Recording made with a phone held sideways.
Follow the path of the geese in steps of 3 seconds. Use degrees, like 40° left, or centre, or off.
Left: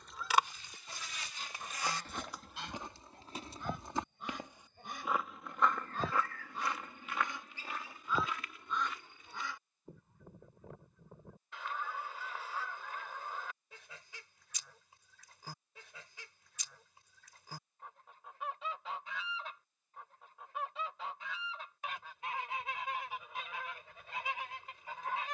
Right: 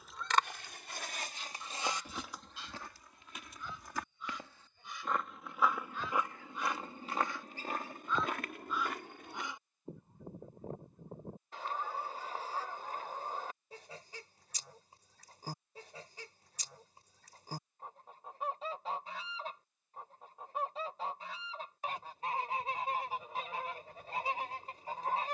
40° left, 50° left, 20° left, 30° right, 30° right, 30° right, 30° right, 30° right, 30° right.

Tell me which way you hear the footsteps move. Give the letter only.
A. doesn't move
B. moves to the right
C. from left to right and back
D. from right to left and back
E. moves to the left
D.